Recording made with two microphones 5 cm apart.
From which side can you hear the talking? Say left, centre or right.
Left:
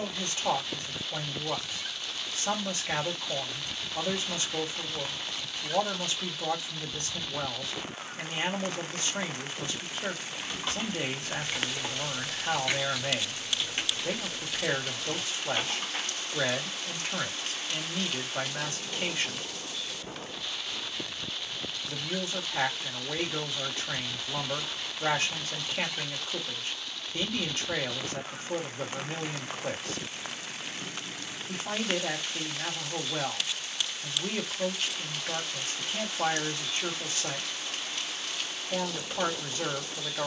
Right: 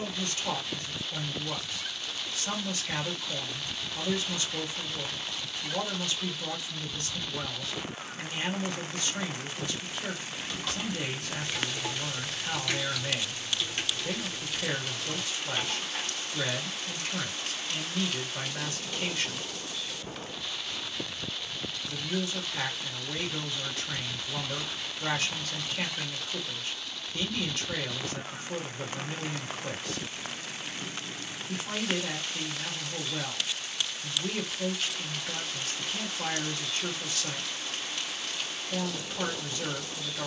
left.